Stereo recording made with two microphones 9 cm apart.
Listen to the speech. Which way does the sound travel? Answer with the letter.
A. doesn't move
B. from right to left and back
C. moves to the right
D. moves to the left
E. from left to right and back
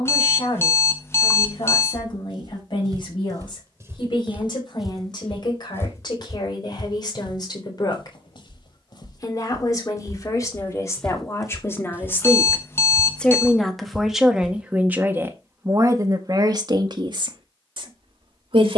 C.